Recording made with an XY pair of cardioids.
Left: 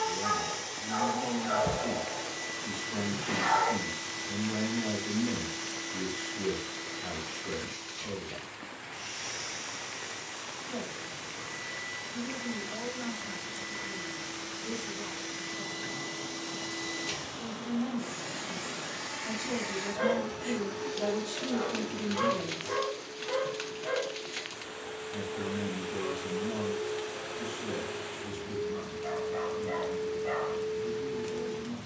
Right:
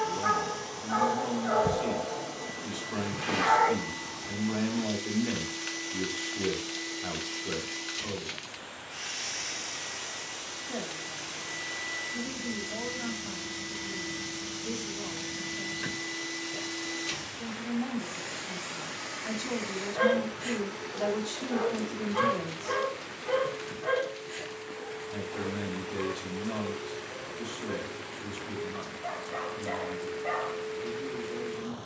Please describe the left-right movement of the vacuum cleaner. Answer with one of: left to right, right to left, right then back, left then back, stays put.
right then back.